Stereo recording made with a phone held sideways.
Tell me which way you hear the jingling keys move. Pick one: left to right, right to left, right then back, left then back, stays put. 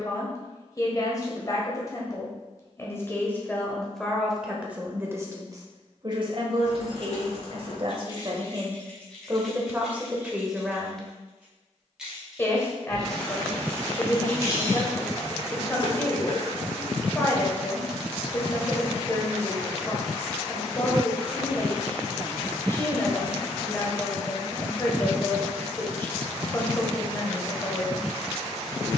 right then back.